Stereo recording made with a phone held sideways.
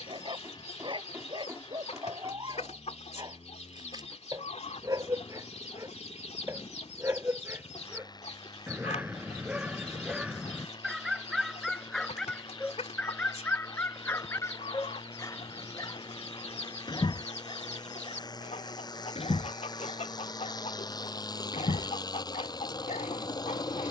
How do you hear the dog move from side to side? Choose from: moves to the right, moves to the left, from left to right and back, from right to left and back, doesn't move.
moves to the left.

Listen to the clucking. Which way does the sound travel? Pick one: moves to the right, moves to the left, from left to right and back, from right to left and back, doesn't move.
doesn't move.